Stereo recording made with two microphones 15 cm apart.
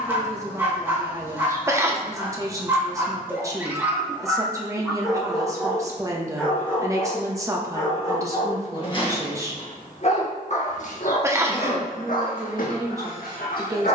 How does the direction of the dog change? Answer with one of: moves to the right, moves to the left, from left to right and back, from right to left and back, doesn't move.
moves to the left.